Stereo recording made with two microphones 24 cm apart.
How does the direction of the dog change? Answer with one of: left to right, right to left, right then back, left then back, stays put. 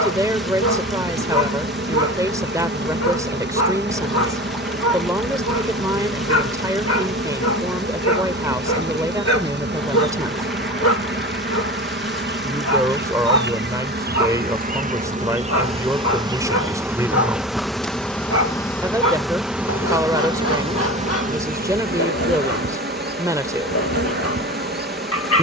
stays put.